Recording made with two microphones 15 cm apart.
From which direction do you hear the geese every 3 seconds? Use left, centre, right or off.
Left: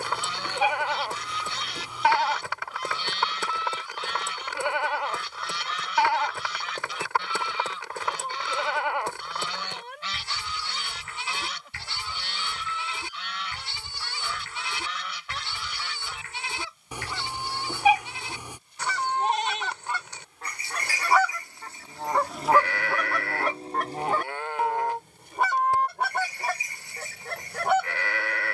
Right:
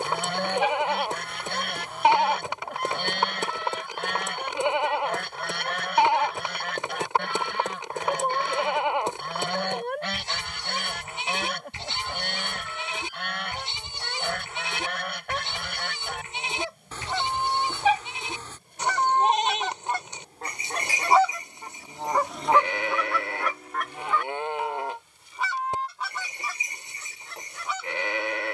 right, right, right, right, right, right, right, centre, left, left.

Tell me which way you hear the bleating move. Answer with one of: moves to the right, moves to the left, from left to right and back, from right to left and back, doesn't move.
doesn't move.